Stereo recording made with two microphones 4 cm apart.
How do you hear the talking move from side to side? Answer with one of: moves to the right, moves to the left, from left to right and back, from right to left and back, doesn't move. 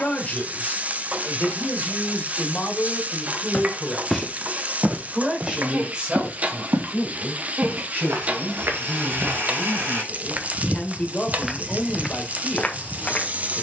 from left to right and back.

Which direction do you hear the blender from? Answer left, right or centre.
right.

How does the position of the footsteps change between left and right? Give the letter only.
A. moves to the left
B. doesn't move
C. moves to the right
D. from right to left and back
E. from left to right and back
E.